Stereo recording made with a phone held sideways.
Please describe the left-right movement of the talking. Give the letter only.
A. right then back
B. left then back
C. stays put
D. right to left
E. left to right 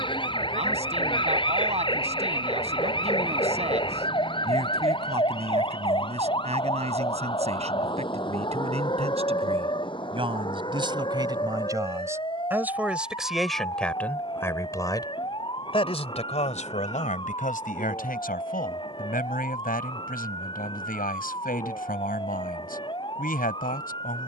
D.